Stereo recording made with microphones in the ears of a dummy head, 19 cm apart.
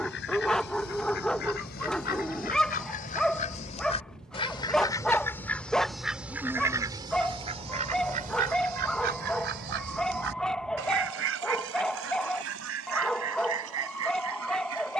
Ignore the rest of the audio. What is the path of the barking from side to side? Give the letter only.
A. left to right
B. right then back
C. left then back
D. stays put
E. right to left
D.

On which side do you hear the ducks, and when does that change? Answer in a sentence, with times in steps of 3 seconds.
You can hear the ducks on the left from 0 s and on the right from 6 s.